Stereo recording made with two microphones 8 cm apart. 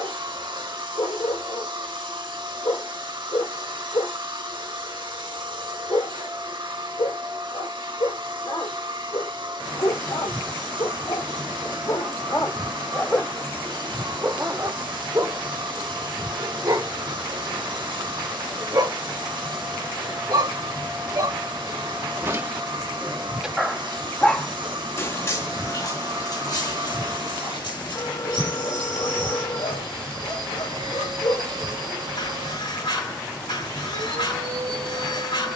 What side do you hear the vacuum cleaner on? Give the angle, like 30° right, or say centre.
70° right.